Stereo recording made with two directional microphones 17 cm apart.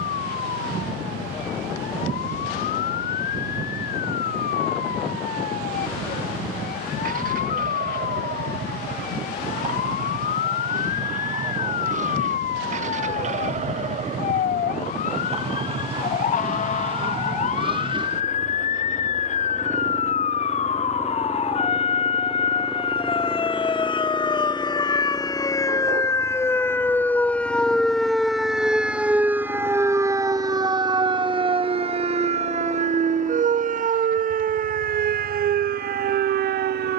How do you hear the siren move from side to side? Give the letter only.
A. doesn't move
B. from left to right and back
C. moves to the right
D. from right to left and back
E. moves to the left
C.